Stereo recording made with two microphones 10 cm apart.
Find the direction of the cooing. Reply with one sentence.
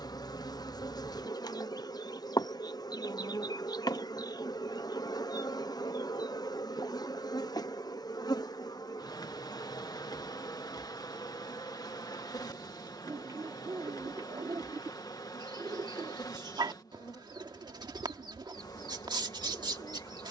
You can hear the cooing on the right.